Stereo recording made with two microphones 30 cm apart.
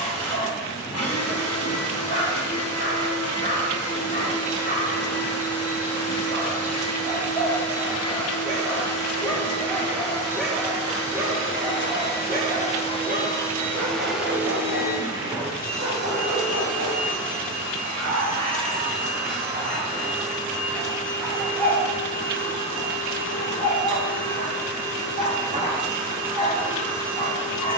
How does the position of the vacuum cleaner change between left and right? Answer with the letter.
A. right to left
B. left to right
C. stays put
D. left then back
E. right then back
B.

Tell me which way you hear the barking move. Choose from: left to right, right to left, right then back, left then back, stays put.
right then back.